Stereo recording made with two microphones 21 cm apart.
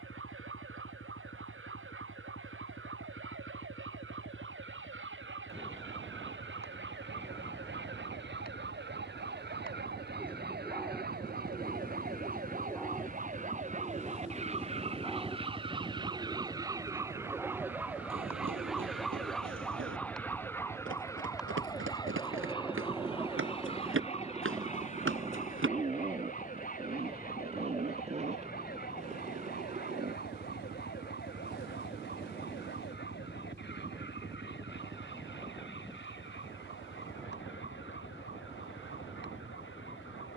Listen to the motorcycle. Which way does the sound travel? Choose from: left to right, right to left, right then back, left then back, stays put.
left to right.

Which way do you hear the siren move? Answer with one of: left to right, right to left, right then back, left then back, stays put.
right to left.